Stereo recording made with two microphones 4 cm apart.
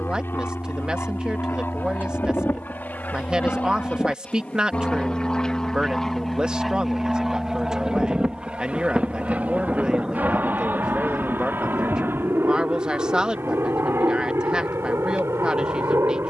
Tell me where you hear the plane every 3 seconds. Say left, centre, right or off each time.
left, left, centre, right, right, right.